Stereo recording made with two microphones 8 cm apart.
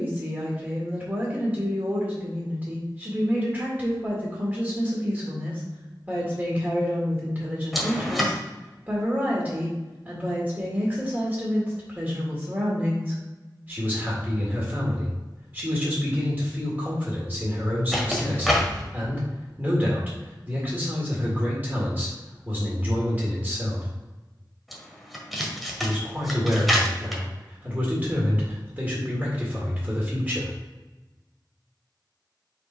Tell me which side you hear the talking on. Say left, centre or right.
right.